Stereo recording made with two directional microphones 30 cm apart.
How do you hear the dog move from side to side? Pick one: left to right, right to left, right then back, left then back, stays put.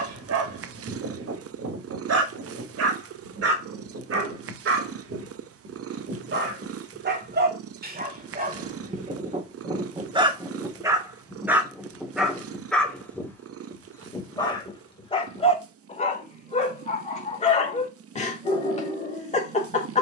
right to left.